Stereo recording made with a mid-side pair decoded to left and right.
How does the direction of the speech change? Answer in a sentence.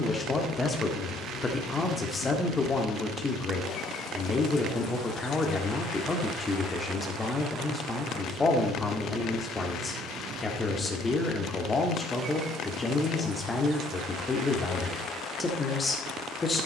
In this clip you hear the speech stay put.